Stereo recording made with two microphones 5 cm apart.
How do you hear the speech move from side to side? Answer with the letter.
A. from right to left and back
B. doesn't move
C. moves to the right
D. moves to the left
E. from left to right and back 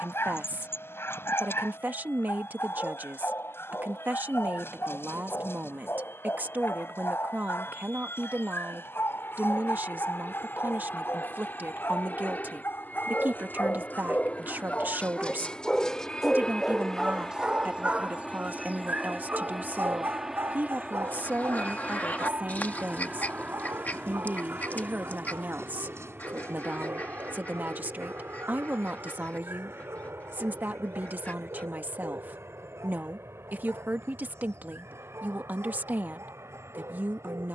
B.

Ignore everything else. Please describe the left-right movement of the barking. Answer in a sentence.
You can hear the barking travel towards the right.